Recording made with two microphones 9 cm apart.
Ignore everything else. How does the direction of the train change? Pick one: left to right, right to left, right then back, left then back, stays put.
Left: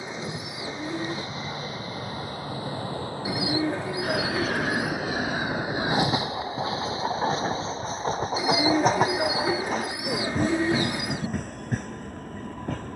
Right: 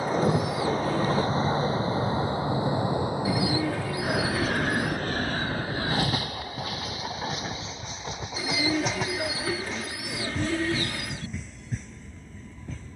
right to left.